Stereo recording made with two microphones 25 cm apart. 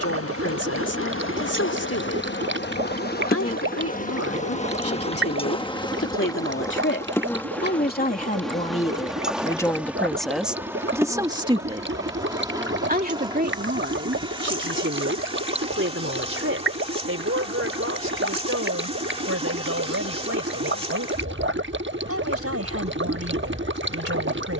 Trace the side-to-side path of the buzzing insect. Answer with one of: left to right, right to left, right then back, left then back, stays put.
left to right.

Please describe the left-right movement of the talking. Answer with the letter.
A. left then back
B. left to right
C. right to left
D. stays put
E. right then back
B.